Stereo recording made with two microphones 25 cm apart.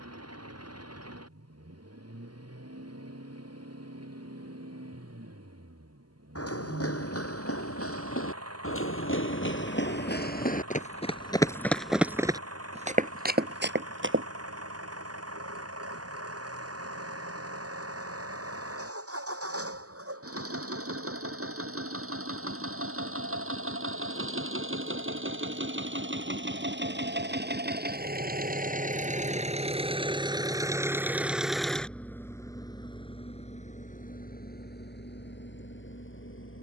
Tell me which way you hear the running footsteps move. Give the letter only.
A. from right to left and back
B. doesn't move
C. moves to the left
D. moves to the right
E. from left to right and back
D.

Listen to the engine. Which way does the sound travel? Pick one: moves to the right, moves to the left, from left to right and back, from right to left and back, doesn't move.
moves to the left.